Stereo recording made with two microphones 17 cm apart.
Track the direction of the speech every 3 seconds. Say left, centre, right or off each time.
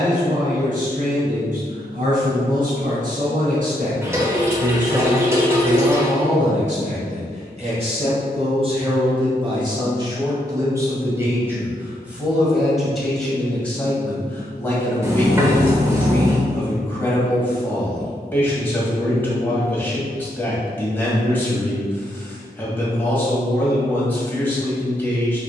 right, right, right, right, centre, centre, centre, centre, centre.